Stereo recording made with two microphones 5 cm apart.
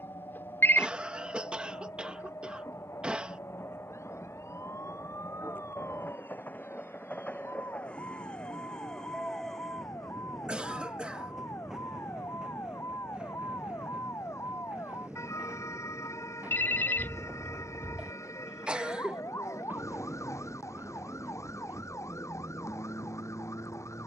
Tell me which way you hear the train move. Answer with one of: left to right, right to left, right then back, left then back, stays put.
left to right.